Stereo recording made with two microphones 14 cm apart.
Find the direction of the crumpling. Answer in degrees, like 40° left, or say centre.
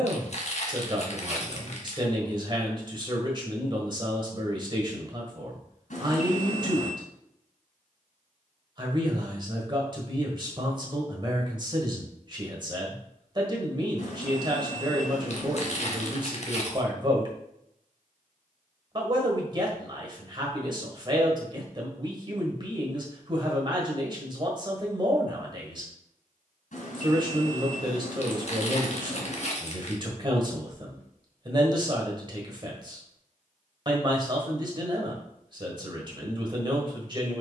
50° left.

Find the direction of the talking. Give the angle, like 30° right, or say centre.
30° right.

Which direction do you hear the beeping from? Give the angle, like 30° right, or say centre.
60° left.